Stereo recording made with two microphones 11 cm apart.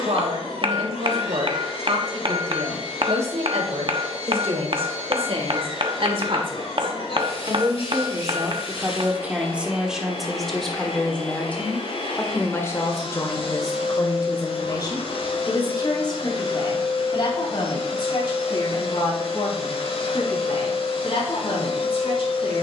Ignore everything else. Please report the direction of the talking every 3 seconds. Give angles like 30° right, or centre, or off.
70° right, 70° right, 40° right, centre, 30° left, 40° left, 50° left, 50° left.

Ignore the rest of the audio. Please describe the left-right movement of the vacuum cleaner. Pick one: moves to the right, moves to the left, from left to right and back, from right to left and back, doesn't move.
doesn't move.